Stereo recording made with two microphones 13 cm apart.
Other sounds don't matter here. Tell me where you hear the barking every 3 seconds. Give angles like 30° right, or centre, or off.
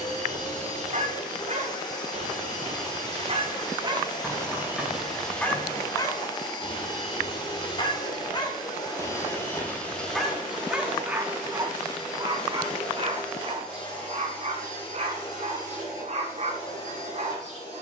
50° right, 20° right, 30° left, centre, 40° right, 50° right.